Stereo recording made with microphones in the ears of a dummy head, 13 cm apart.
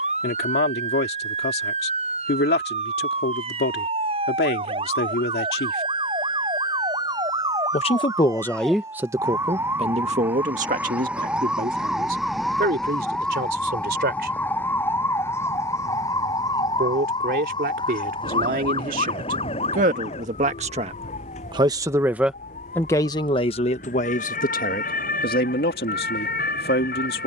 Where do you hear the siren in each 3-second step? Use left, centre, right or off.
right, right, right, centre, centre, left, left, left, left.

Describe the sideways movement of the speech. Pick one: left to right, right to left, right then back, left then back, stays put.
right then back.